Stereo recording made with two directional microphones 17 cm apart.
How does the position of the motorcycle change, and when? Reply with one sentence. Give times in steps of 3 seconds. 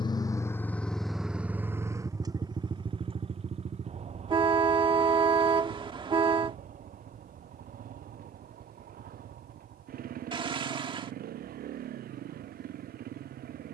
In this clip you hear the motorcycle in the centre from 0 s and on the right from 3 s.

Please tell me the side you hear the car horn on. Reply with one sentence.
You can hear the car horn on the right.